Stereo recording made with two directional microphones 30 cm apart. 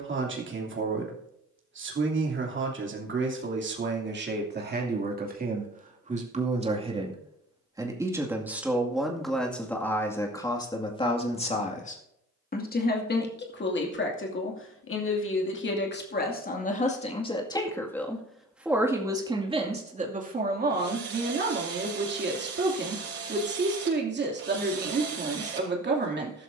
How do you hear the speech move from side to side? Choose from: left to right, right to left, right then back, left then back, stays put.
left then back.